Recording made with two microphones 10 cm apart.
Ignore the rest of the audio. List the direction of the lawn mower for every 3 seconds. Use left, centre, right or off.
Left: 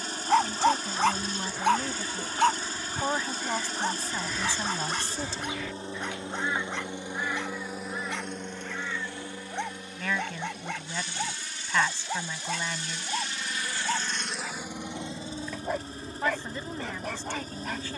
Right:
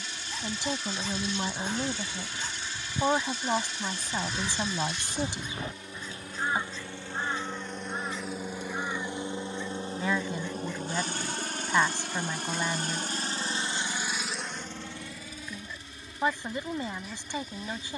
left, left, centre, right, right, left.